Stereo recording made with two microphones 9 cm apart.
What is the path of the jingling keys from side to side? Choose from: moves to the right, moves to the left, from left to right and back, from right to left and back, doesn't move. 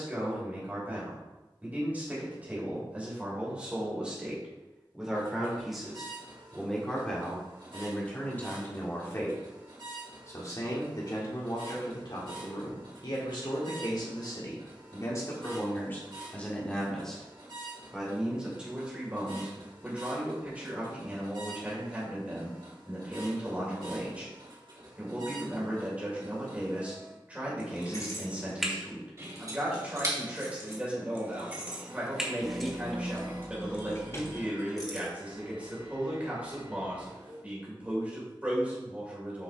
from left to right and back.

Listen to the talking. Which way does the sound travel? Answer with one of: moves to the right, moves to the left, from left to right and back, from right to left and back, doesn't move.
from right to left and back.